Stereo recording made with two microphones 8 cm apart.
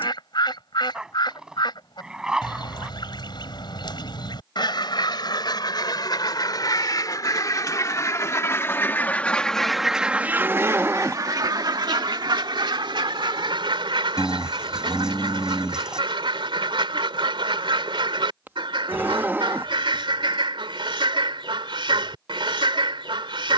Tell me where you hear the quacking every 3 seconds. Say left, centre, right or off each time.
left, left, left, right, right, right, right, right.